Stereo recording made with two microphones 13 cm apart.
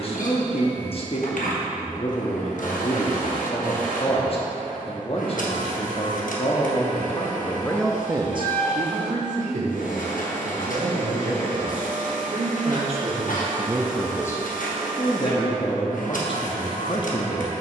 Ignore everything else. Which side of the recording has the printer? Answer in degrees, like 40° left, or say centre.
80° left.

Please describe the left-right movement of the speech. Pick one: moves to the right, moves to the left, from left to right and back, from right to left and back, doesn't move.
from left to right and back.